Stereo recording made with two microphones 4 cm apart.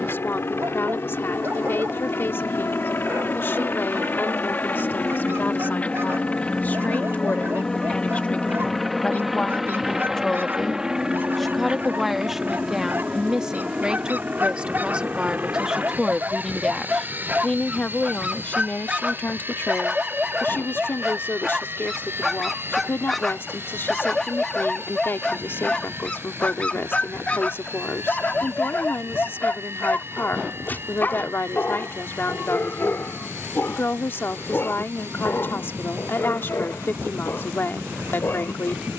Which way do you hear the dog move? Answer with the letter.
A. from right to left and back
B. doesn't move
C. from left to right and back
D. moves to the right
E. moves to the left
E.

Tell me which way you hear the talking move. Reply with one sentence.
You can hear the talking move from left to right and back again.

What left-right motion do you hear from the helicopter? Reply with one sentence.
In this clip you hear the helicopter move to the right.